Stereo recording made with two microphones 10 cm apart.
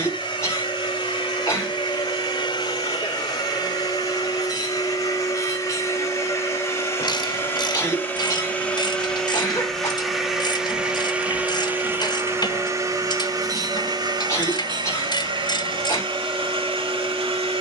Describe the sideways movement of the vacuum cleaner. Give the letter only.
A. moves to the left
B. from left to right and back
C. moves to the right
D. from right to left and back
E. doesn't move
C.